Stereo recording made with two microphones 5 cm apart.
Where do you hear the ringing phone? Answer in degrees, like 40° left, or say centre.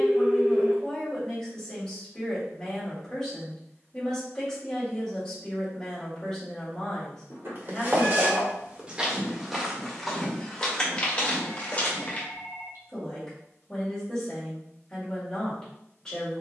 60° right.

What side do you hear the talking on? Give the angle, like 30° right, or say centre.
10° left.